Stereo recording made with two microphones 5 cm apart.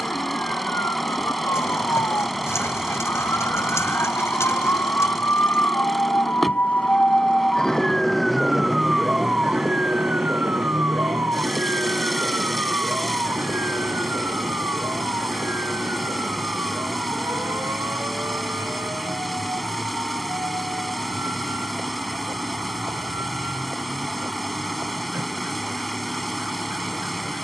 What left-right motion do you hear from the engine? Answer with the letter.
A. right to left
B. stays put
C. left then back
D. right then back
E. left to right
B.